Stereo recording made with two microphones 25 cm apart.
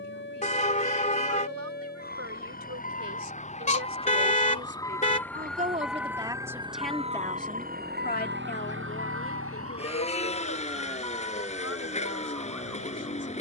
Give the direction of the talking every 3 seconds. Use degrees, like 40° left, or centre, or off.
70° right, 50° right, 20° left, 60° left, 70° left.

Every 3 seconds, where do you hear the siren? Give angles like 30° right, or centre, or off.
40° left, 20° left, 30° right, 70° right, 80° right.